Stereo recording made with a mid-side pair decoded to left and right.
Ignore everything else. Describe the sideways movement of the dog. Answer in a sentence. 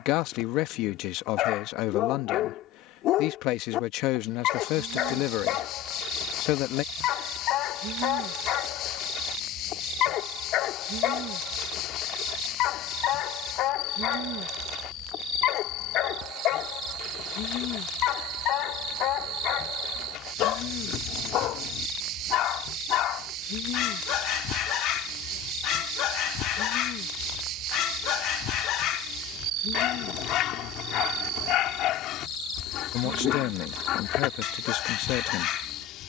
You can hear the dog stay put.